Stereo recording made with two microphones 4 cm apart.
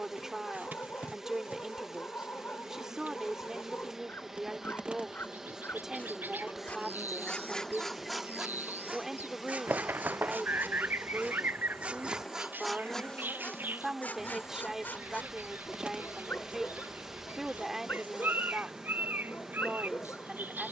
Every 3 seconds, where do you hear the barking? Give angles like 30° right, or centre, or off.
50° left, 50° left, 10° left, 50° right, 20° left, 50° left, 50° left.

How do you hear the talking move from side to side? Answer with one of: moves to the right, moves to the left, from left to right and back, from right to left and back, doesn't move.
doesn't move.